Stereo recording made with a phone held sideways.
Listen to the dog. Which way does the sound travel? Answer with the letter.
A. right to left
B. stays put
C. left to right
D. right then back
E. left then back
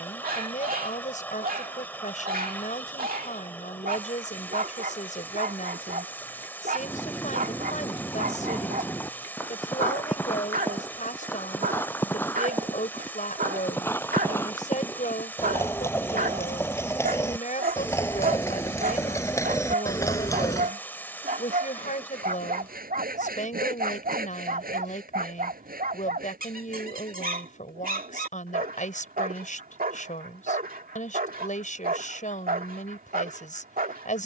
B.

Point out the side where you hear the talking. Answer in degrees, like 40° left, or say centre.
50° left.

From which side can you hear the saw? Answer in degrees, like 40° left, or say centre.
70° right.